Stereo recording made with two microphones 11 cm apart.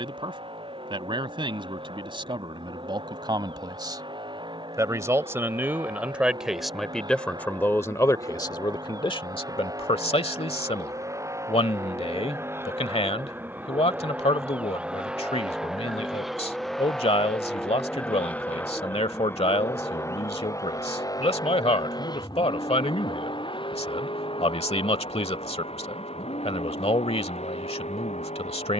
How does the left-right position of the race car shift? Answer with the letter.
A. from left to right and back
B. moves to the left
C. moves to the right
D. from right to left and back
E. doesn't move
B.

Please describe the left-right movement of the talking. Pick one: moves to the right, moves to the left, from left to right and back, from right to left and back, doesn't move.
moves to the left.